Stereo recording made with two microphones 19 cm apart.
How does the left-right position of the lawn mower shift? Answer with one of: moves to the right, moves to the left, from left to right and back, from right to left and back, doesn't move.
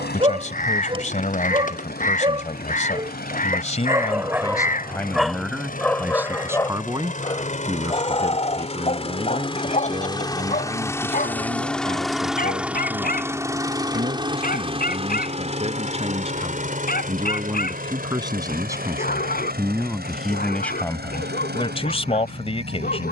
moves to the right.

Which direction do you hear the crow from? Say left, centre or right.
left.